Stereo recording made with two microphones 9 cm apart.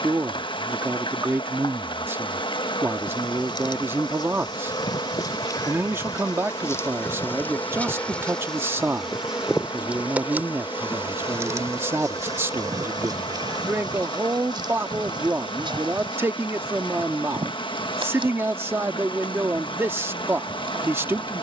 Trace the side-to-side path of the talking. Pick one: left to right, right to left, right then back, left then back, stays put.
stays put.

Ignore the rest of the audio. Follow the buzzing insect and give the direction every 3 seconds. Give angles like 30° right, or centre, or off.
60° left, 50° left, 20° left, 20° right, 50° right, 60° right, 60° right.